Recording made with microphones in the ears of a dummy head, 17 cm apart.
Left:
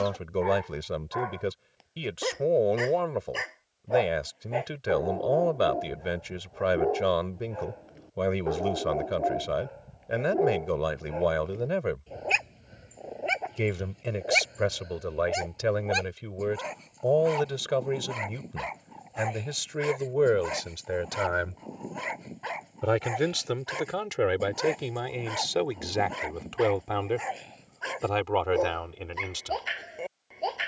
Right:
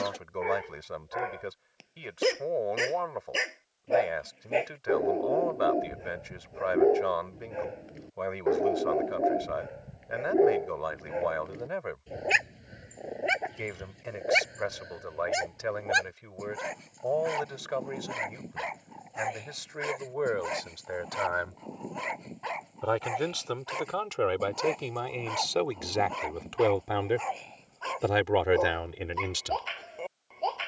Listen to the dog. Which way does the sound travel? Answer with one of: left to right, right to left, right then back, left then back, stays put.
right to left.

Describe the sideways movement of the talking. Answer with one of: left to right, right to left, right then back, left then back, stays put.
left to right.